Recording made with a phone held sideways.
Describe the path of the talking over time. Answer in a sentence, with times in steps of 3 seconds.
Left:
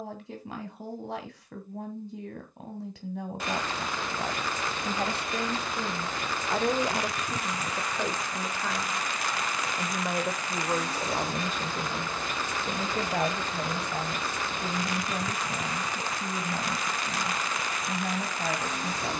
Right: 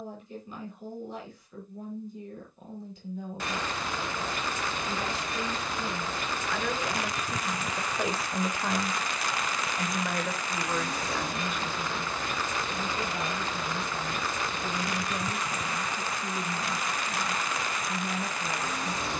You can hear the talking on the left from 0 s, in the centre from 6 s and on the left from 9 s.